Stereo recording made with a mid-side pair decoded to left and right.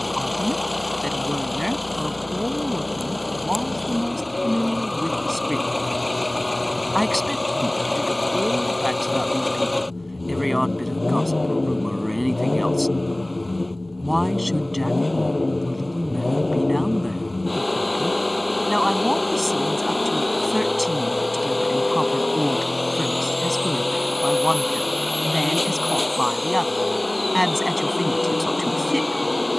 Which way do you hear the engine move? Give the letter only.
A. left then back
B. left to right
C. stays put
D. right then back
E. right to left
C.